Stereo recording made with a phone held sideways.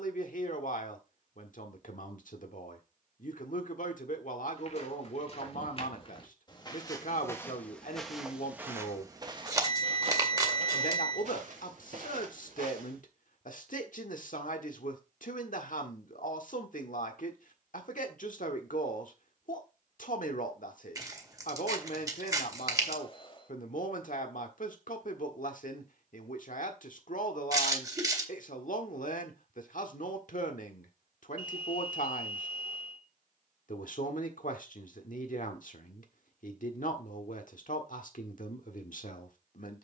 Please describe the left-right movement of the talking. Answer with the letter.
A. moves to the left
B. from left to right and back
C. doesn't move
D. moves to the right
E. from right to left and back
C.